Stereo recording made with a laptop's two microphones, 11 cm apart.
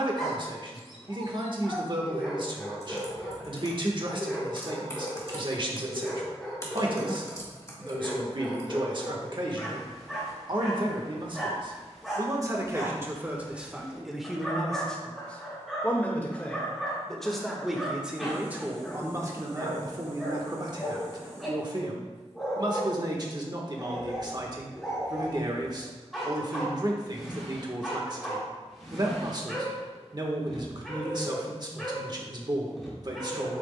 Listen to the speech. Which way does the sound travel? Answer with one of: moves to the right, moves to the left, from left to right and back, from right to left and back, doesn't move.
from right to left and back.